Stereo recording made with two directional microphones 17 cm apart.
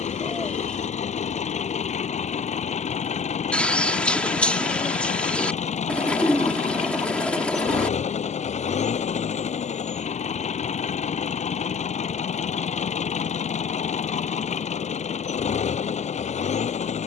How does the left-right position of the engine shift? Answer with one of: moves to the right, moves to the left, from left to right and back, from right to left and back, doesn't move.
doesn't move.